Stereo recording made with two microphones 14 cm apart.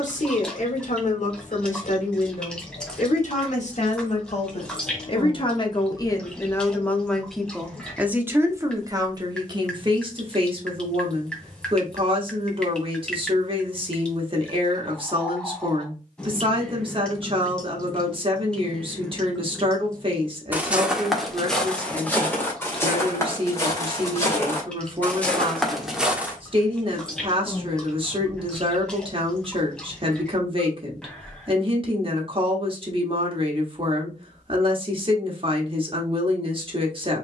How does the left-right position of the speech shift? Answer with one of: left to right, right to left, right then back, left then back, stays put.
left to right.